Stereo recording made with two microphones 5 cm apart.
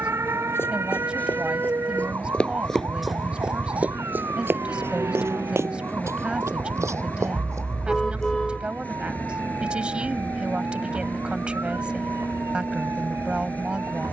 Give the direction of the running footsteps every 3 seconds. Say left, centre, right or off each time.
left, right, right, off, off.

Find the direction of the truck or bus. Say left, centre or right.
left.